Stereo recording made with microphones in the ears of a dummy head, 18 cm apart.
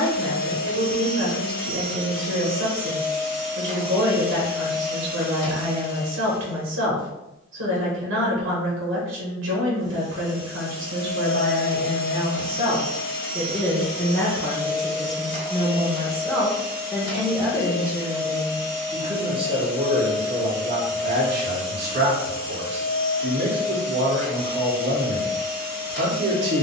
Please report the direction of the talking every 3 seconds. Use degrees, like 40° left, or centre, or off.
70° right, 70° right, 70° right, 60° right, 10° right, centre, 30° right, 60° right, 60° right.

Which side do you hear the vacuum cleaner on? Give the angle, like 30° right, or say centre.
20° left.